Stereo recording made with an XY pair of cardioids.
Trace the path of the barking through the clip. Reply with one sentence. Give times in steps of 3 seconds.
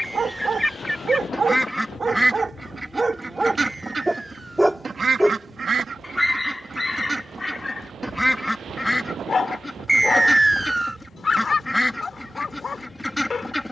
You can hear the barking on the right from 0 s, in the centre from 3 s and on the left from 6 s.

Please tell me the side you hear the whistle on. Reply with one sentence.
In this clip you hear the whistle in the centre.